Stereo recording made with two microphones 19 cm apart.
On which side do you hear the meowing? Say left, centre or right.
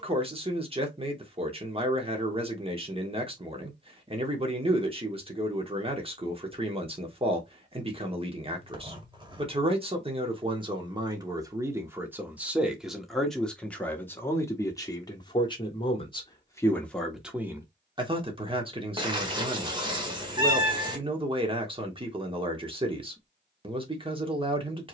right.